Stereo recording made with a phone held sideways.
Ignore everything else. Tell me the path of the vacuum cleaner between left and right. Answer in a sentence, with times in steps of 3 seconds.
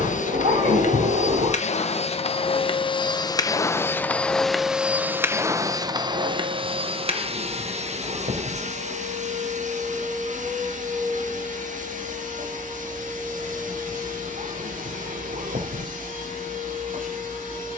In this clip you hear the vacuum cleaner on the left from 0 s, in the centre from 3 s and on the right from 6 s.